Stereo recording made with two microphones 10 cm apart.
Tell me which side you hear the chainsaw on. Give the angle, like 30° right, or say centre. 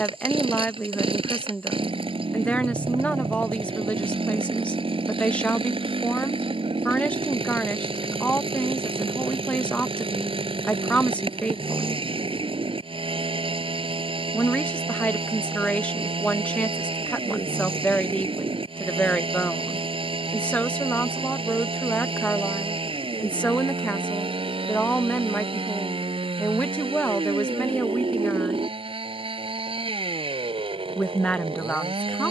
70° right.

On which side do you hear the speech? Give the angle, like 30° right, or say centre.
10° left.